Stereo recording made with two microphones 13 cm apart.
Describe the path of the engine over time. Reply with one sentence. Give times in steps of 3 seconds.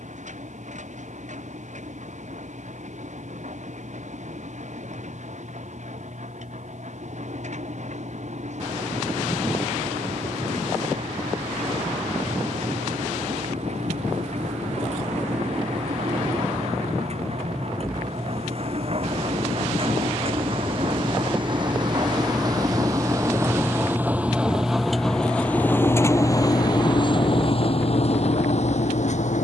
You can hear the engine on the right from 0 s, in the centre from 24 s and on the left from 27 s.